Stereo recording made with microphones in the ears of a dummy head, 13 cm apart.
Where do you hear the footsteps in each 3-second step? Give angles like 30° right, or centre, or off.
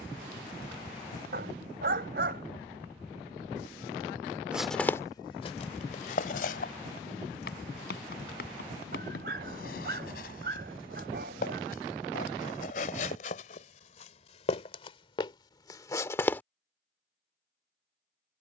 off, 20° left, 70° left, 70° left, 50° left, 20° left.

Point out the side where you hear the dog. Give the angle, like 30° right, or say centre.
70° right.